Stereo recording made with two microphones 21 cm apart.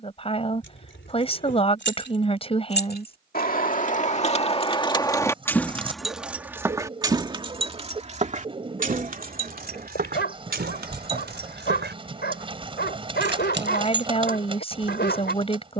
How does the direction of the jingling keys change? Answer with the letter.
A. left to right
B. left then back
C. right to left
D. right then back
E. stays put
A.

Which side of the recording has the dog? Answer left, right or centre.
left.